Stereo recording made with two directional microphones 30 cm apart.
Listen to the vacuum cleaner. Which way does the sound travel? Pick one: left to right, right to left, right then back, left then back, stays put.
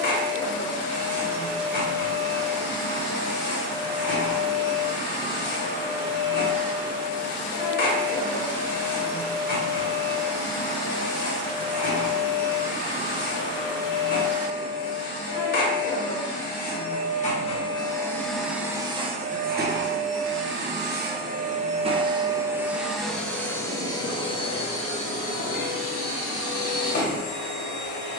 right then back.